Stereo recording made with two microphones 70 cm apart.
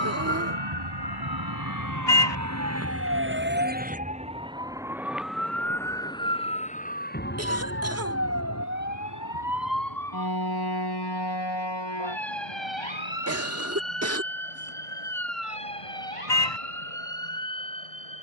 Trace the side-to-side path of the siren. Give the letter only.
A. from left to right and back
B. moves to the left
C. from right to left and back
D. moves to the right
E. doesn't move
B.